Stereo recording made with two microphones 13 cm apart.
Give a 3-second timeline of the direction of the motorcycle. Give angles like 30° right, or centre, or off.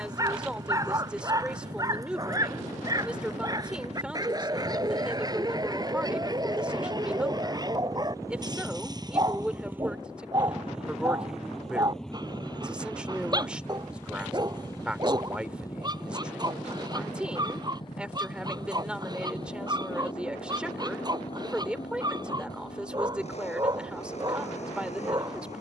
60° right, 50° right, 30° right, 10° right, 10° left, 30° left, 40° left, 50° left, 50° left.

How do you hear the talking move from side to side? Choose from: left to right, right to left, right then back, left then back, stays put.
stays put.